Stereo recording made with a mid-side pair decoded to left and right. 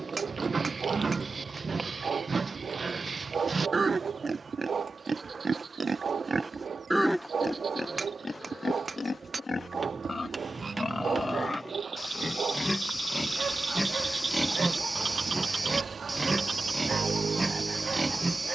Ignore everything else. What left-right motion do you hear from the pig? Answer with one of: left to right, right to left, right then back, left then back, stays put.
left then back.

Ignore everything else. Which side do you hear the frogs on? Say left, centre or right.
right.